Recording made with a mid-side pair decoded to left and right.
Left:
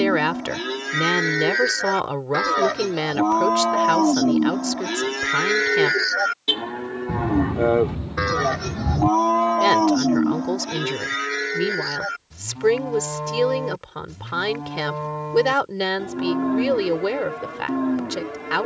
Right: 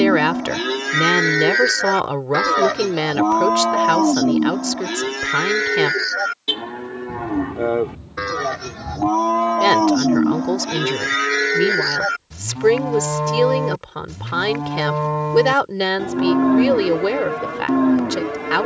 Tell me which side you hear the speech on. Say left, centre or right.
right.